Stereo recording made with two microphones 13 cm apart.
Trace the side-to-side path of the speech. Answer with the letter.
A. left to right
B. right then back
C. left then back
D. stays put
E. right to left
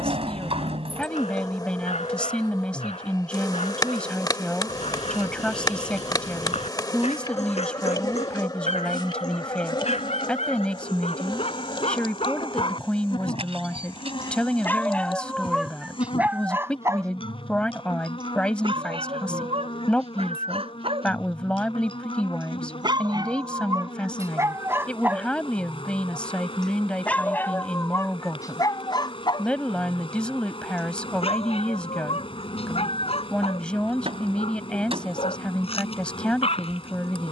D.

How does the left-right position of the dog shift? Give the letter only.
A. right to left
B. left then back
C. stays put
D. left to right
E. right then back
E.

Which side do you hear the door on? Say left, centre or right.
right.